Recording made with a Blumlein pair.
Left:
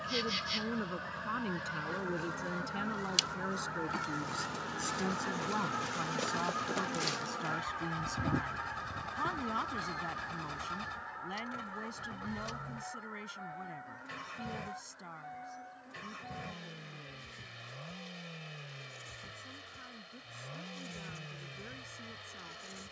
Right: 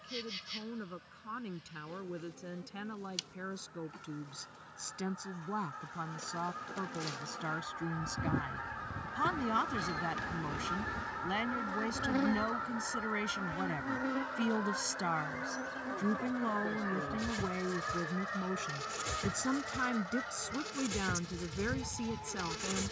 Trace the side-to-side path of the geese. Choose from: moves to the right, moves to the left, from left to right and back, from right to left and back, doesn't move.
moves to the right.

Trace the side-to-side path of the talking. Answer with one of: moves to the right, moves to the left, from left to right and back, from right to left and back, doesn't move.
moves to the right.